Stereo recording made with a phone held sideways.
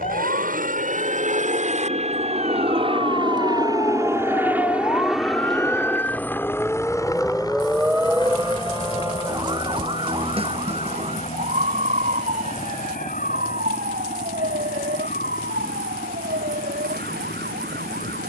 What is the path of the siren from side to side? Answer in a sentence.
You can hear the siren travel towards the right.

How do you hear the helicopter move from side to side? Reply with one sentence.
You can hear the helicopter move to the left.